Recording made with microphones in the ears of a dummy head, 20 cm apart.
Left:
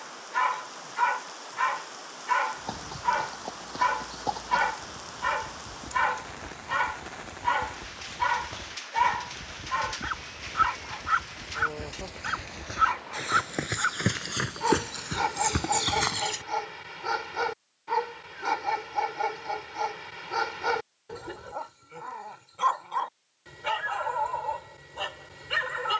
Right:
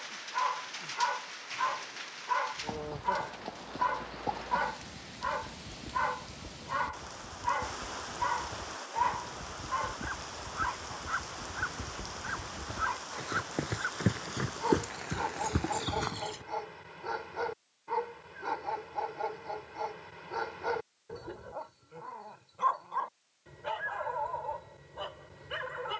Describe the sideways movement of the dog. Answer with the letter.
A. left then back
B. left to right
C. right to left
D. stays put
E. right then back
D.